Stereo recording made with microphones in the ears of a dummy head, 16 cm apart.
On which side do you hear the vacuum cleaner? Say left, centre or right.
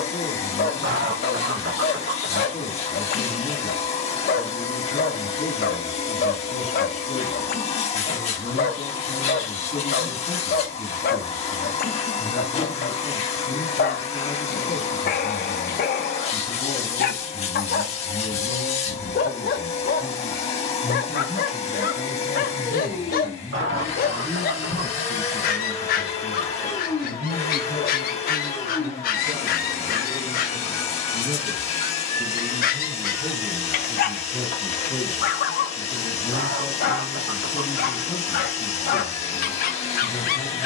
left.